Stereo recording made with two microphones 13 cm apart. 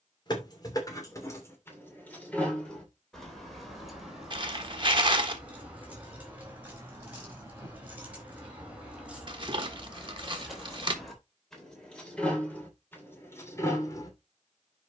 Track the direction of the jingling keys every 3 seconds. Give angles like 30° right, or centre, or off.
20° left, centre, 10° right, centre, 20° left.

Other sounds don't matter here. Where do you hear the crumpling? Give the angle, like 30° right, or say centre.
40° right.